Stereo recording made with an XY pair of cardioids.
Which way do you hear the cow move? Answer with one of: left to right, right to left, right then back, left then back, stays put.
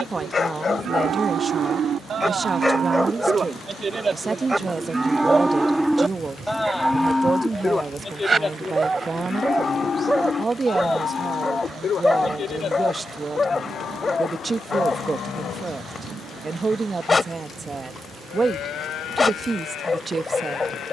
right to left.